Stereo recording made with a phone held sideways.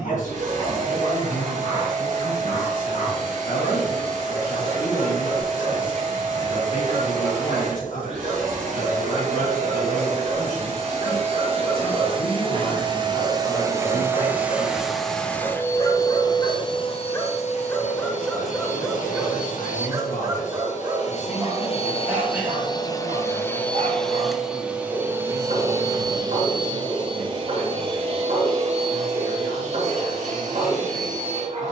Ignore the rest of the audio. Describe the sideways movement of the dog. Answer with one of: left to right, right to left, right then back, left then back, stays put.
left to right.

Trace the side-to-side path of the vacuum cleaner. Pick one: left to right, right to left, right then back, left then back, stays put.
left then back.